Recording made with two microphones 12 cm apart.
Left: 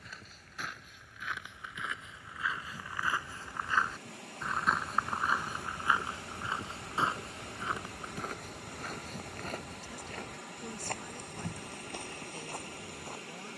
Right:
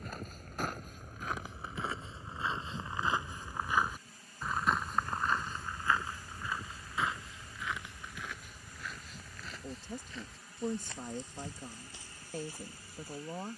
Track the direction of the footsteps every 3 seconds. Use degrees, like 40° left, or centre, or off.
40° right, centre, 40° left, 60° left, 60° left.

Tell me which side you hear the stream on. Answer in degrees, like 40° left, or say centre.
70° left.